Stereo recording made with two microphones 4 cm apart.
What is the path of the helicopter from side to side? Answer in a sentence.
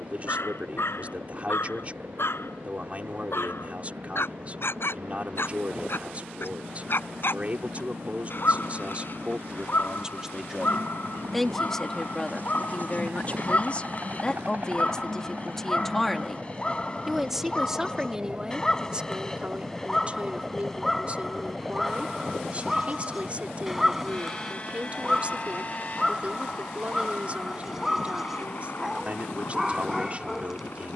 In this clip you hear the helicopter travel towards the left.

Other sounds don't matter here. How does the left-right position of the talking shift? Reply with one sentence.
In this clip you hear the talking move from right to left and back again.